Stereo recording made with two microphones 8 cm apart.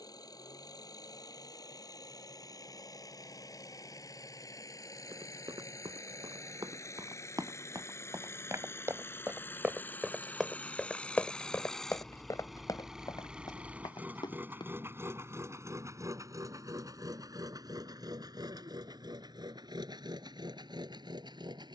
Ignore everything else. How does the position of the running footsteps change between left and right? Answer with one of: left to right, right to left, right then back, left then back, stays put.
right to left.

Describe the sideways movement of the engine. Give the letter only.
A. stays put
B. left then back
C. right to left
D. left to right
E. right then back
D.